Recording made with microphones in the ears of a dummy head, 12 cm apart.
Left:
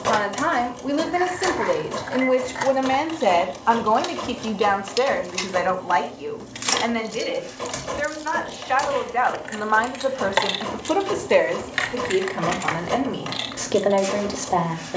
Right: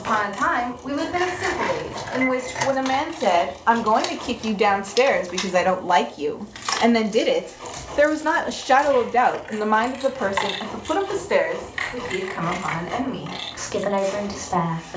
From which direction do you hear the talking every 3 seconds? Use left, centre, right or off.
left, centre, right, centre, left.